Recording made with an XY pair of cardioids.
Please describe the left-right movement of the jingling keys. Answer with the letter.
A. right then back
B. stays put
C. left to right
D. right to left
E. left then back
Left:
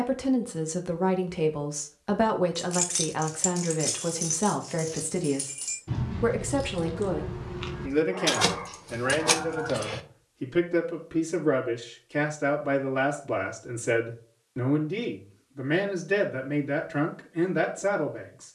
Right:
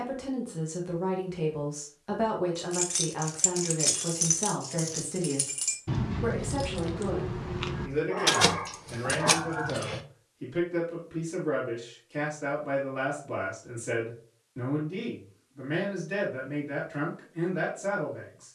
A.